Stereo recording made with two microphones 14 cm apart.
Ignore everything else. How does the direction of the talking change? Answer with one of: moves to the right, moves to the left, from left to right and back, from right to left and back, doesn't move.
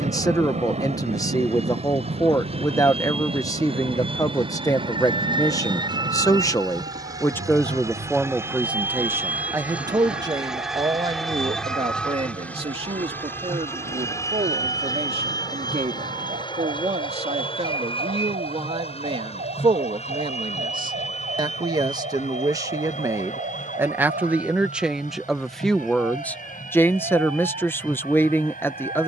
from left to right and back.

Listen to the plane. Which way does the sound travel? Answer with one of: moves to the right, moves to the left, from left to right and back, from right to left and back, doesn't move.
moves to the left.